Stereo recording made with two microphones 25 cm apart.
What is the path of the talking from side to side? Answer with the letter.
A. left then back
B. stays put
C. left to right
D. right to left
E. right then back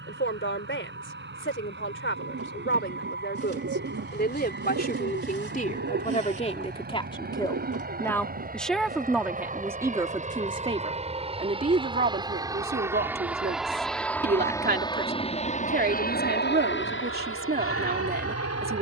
C.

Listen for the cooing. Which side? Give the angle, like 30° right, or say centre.
60° right.